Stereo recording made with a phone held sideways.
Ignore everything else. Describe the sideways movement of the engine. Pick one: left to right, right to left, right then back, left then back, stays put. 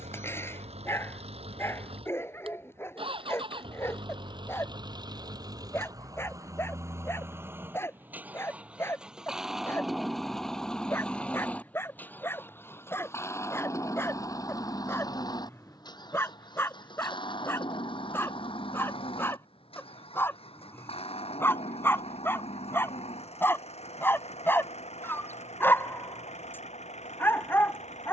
right to left.